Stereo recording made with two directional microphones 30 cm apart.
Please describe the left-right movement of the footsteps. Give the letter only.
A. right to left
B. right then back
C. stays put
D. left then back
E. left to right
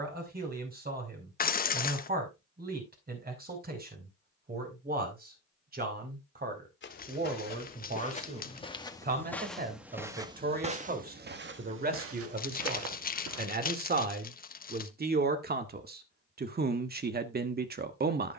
E.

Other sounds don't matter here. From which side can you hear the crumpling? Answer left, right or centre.
left.